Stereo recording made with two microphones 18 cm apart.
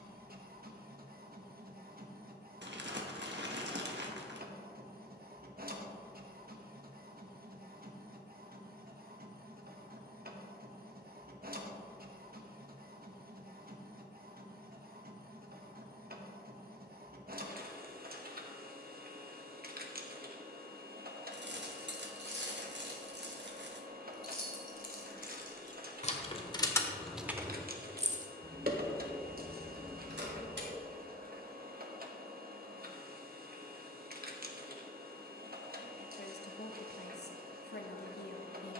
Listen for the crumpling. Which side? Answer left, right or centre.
right.